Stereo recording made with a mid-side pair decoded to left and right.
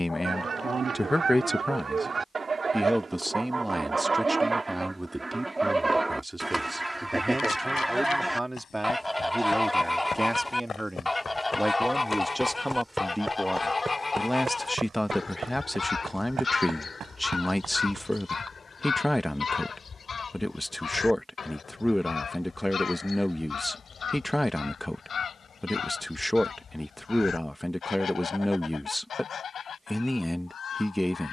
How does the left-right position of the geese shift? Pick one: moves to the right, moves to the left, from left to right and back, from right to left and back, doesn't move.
moves to the left.